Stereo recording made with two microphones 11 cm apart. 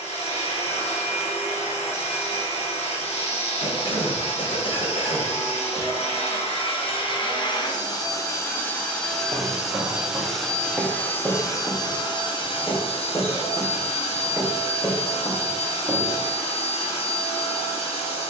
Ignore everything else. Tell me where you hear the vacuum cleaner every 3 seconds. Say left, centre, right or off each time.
left, left, left, centre, left, left.